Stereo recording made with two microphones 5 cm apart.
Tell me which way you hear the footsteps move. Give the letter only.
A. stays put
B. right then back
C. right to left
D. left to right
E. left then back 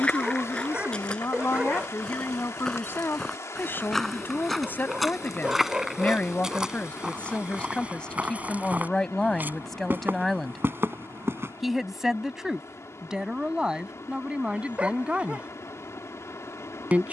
D.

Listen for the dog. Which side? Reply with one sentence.
You can hear the dog on the right.